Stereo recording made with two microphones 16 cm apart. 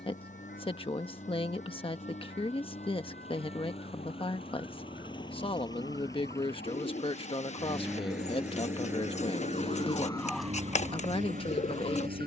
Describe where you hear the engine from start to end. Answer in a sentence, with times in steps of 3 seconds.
You can hear the engine on the left from 0 s, in the centre from 6 s and on the right from 9 s.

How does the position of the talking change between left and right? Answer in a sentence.
You can hear the talking stay put.